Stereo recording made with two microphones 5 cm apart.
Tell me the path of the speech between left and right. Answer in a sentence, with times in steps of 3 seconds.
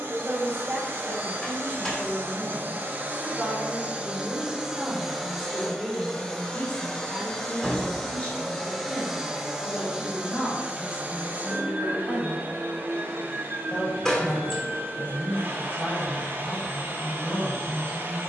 You can hear the speech on the right from 0 s, in the centre from 3 s and on the left from 6 s.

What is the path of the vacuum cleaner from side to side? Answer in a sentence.
In this clip you hear the vacuum cleaner move from right to left and back again.